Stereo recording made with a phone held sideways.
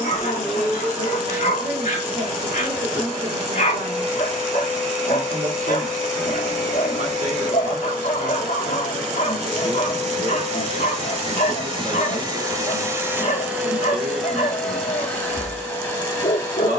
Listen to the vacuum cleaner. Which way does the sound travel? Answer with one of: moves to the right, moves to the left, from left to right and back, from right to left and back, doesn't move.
moves to the left.